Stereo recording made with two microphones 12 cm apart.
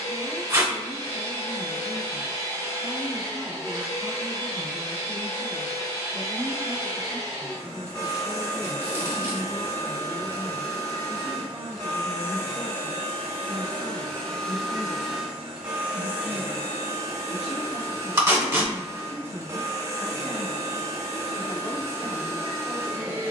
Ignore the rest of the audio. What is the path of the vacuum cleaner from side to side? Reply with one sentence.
You can hear the vacuum cleaner move to the right.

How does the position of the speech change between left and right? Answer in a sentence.
In this clip you hear the speech go right and come back.